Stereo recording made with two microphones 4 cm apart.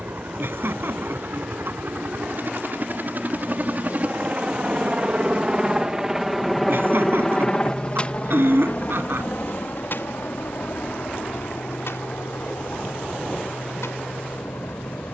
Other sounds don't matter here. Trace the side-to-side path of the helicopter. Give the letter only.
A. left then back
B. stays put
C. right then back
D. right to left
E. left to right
D.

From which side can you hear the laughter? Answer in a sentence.
In this clip you hear the laughter on the right.